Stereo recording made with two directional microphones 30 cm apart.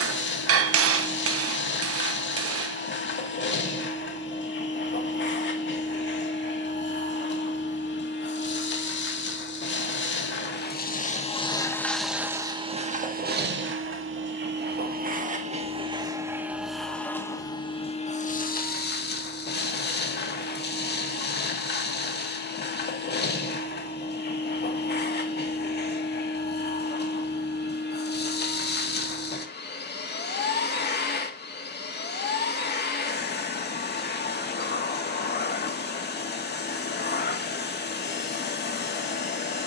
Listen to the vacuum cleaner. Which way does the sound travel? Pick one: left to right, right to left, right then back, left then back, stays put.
right then back.